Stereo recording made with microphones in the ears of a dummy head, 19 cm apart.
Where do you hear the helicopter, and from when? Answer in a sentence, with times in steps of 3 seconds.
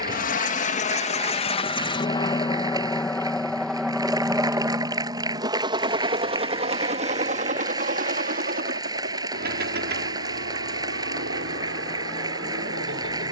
In this clip you hear the helicopter on the left from 0 s, in the centre from 3 s and on the right from 6 s.